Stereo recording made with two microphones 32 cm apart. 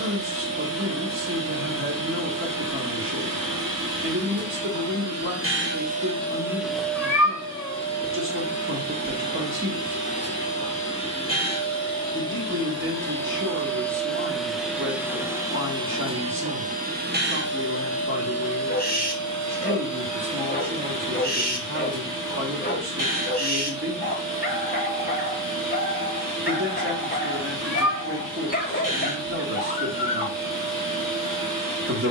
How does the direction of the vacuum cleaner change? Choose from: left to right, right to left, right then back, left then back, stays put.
left then back.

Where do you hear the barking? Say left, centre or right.
left.